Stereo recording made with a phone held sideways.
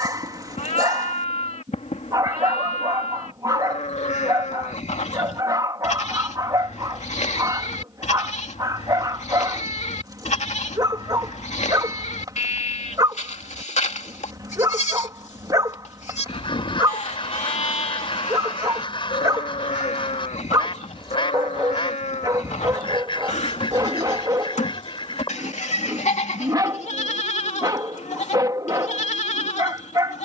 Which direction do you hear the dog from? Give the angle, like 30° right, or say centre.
30° right.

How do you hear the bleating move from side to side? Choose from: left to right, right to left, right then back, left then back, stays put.
stays put.